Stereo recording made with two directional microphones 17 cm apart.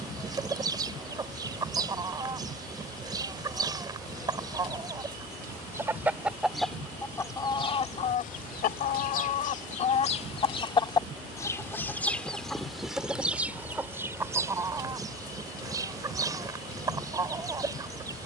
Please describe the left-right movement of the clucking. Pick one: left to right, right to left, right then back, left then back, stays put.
left then back.